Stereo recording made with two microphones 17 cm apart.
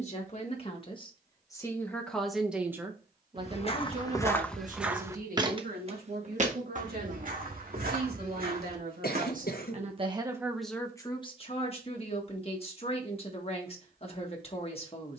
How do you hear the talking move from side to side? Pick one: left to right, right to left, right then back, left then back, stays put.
right then back.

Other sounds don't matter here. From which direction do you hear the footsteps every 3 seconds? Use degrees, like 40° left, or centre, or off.
off, 10° left, 60° right, 70° right, off.